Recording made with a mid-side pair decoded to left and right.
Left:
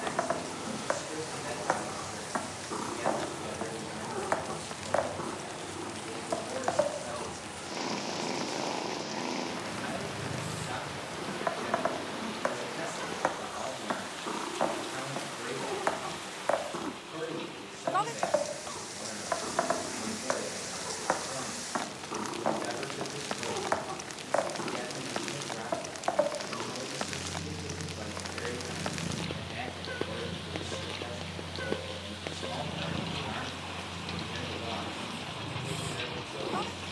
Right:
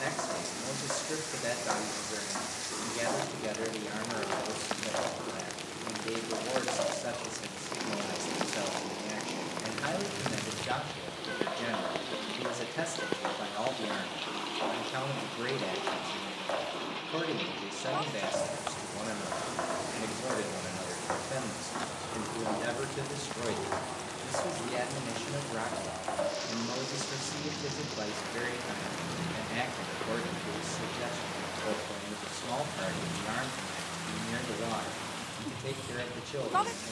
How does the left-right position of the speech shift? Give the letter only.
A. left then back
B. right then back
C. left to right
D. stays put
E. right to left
D.